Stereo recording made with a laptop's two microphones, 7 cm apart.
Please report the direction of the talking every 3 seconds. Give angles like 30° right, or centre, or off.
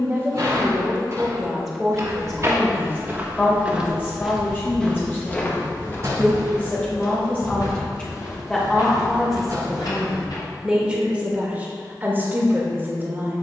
centre, 30° left, 20° left, 10° right, 20° right.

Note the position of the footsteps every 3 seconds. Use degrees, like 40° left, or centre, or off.
40° right, centre, 50° left, 60° left, off.